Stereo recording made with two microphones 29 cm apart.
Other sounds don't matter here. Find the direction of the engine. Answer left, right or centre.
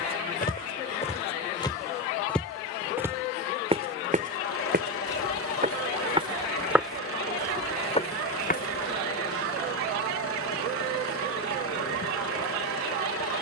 left.